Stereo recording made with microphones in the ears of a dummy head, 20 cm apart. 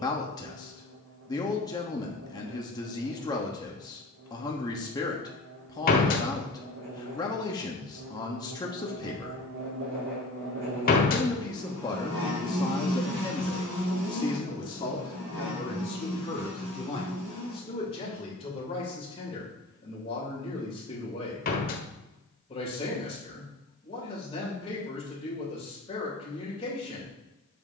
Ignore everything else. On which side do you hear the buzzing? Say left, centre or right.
right.